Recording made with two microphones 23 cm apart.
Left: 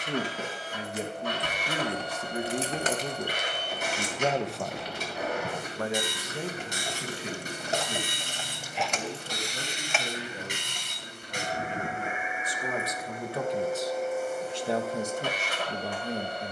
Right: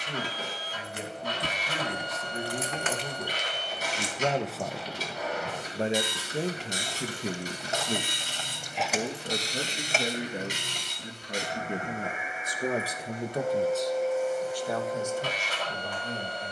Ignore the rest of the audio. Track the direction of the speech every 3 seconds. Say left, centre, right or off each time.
left, centre, right, right, centre, left.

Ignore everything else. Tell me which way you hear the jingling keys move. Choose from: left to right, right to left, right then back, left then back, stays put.
left then back.